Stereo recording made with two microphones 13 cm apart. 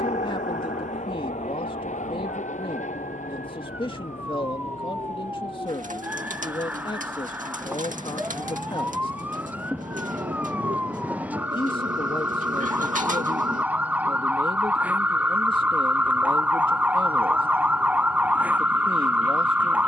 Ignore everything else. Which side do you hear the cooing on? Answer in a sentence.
In this clip you hear the cooing on the right.